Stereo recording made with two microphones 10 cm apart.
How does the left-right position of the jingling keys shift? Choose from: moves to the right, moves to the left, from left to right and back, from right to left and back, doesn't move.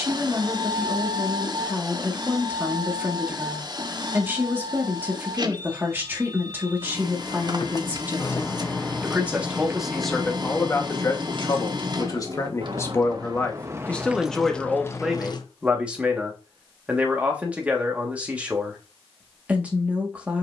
from left to right and back.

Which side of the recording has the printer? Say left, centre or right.
right.